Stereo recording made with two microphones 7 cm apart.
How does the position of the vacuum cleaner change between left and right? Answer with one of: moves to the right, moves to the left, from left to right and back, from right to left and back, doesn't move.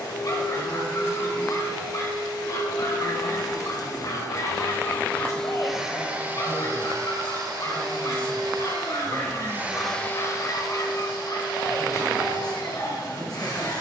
from left to right and back.